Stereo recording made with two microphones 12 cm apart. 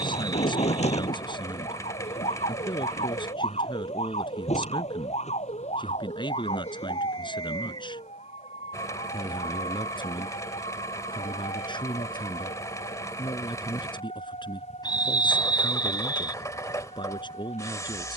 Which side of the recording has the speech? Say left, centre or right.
left.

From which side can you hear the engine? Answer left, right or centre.
left.